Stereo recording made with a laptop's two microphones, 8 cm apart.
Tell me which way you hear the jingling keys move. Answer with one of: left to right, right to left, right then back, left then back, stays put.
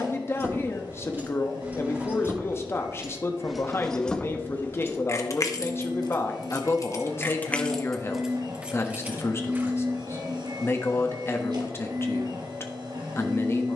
left then back.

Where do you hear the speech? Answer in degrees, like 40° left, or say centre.
30° left.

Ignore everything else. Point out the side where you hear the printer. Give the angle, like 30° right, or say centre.
70° right.